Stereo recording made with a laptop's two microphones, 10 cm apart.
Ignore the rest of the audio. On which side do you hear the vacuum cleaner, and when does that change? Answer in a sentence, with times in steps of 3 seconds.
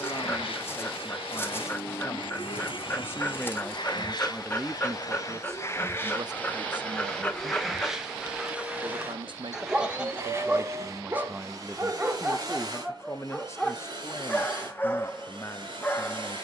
In this clip you hear the vacuum cleaner on the left from 0 s, in the centre from 6 s and on the right from 9 s.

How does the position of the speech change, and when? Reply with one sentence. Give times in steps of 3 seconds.
In this clip you hear the speech on the left from 0 s, in the centre from 3 s, on the right from 6 s and on the left from 12 s.